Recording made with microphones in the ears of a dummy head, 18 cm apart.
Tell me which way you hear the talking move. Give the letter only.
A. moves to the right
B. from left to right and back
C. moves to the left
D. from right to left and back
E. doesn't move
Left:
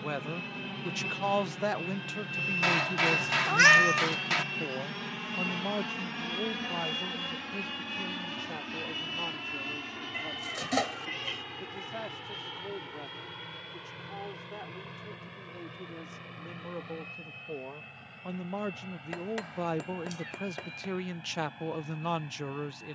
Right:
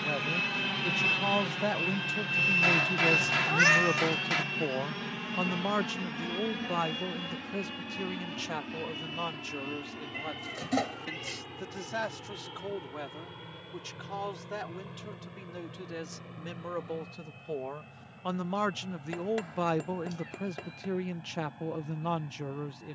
B.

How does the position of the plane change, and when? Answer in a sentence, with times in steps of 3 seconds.
You can hear the plane on the right from 0 s, in the centre from 3 s and on the left from 6 s.